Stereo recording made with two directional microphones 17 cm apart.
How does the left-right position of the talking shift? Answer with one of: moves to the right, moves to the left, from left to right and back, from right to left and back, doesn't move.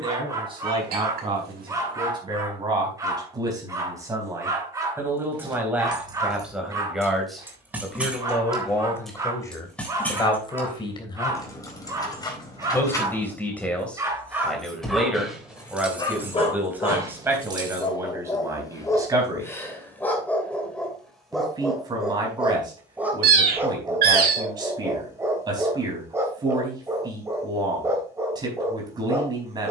from right to left and back.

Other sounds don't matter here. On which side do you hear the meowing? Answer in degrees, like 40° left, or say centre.
60° right.